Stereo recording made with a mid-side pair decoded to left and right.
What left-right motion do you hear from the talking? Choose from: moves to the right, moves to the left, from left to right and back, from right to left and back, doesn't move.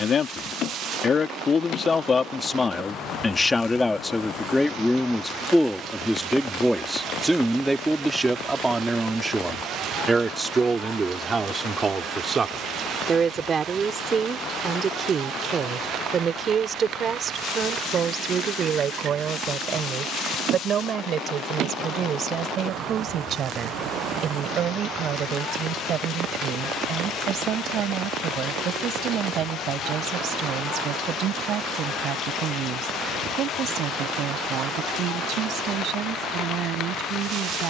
moves to the right.